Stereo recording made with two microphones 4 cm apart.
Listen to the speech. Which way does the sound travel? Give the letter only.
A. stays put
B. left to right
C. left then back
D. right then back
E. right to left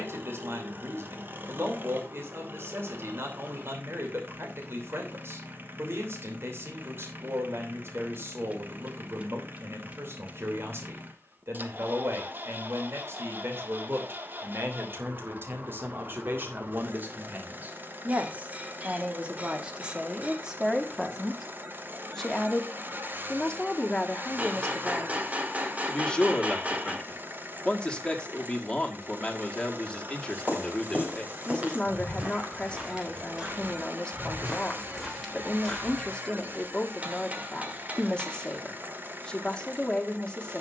E.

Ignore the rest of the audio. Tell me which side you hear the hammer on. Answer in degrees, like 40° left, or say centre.
30° right.